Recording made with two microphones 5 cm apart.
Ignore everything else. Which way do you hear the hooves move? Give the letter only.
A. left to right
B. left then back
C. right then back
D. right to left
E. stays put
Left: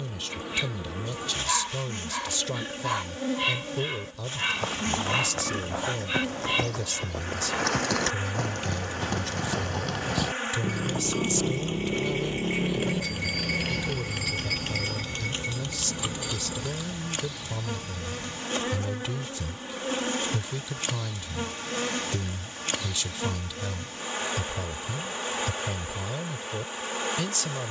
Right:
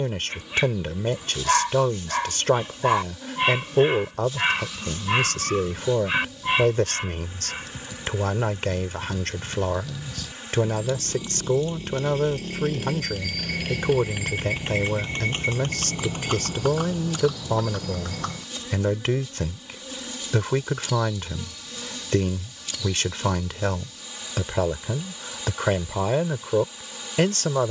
A.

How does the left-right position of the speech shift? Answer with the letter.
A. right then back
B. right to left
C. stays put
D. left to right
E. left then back
C.